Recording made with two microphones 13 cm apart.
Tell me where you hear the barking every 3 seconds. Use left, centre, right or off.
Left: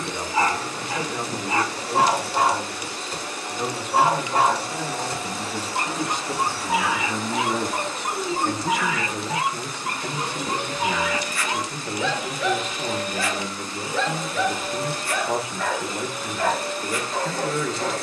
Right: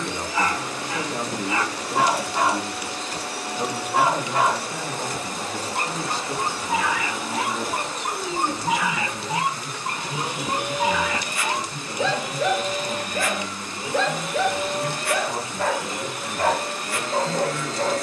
left, left, centre, right, right, right.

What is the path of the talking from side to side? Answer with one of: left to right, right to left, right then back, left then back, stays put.
right to left.